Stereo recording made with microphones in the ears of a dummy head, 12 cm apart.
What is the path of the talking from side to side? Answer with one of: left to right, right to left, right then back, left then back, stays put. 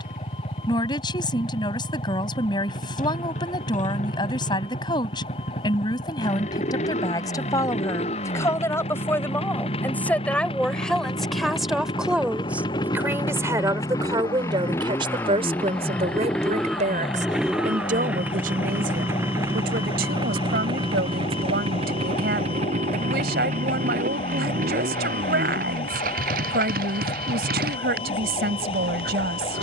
left to right.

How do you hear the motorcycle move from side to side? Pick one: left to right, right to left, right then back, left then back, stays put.
left to right.